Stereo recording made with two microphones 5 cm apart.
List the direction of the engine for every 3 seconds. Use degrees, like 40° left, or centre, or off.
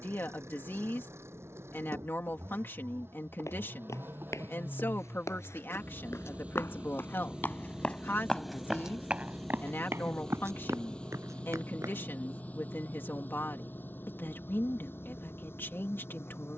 50° right, 40° right, 10° right, 20° left, 40° left, 50° left.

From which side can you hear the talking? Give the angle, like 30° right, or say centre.
40° left.